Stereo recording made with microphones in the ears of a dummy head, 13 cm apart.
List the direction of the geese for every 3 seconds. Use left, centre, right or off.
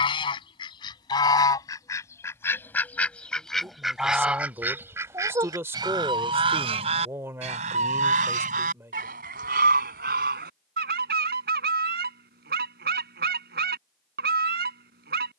left, centre, right, right, right.